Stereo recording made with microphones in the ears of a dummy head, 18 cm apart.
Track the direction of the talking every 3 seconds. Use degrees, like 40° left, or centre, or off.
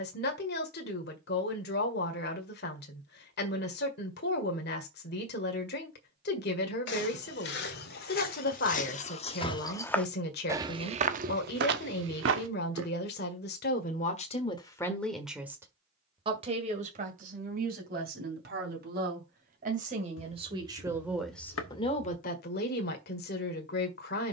50° left, 50° left, 50° left, 50° left, 40° left, 30° right, 40° right, 40° left.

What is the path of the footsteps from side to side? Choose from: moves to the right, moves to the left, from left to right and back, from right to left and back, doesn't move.
moves to the right.